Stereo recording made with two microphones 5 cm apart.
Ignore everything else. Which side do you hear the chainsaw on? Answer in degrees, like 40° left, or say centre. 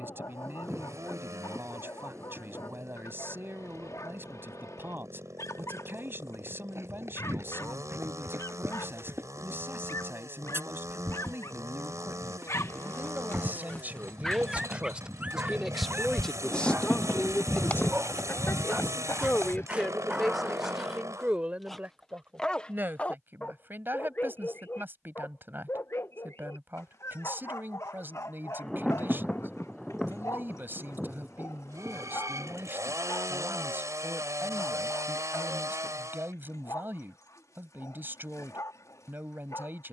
70° right.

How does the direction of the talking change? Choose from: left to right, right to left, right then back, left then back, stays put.
left then back.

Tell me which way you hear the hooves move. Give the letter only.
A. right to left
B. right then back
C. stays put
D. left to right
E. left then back
A.